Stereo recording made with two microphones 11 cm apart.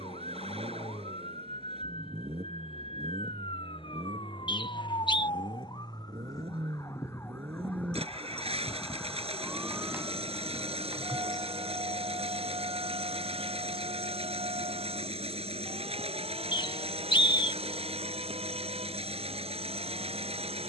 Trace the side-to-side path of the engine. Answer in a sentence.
You can hear the engine stay in one place.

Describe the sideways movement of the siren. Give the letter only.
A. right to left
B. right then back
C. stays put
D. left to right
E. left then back
D.